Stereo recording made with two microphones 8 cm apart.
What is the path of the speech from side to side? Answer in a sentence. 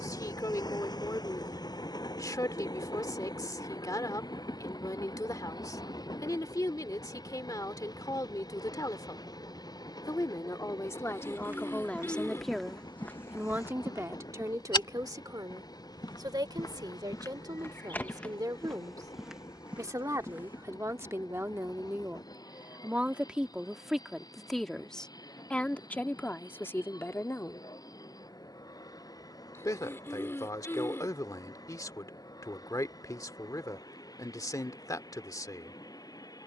You can hear the speech move from left to right and back again.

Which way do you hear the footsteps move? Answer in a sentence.
In this clip you hear the footsteps go left and come back.